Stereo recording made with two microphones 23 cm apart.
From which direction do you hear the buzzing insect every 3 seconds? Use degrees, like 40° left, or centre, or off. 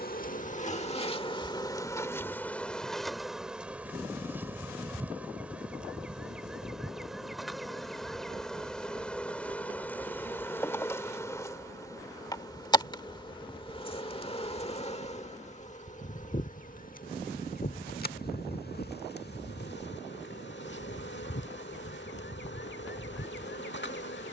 20° left, 10° right, centre, 10° left, 20° left, 40° left, 50° left, 50° left.